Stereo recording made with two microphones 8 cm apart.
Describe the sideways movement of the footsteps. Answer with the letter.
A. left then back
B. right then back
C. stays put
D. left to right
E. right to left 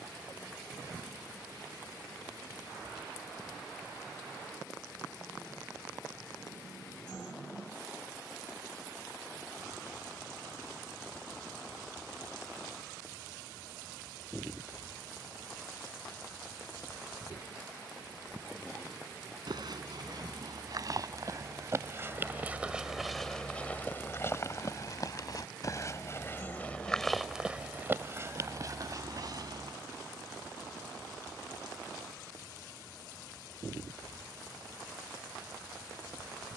A.